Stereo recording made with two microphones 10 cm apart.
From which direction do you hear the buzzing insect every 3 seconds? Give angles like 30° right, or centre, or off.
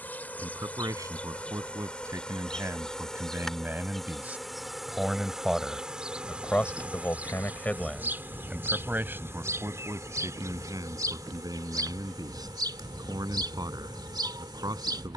10° left, centre, 20° right, 30° right, 50° right.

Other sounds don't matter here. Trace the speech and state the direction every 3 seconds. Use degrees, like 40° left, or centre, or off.
30° right, 10° right, 10° left, 40° right, 40° right.